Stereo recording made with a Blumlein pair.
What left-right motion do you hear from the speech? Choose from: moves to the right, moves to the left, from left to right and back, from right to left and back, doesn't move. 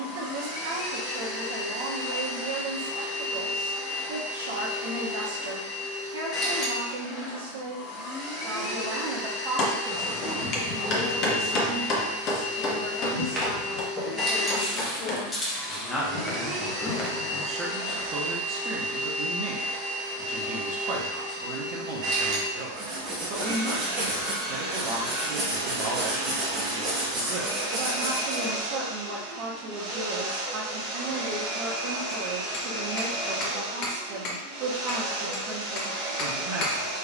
from right to left and back.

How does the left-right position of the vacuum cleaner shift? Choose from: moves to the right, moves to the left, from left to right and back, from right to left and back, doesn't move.
moves to the right.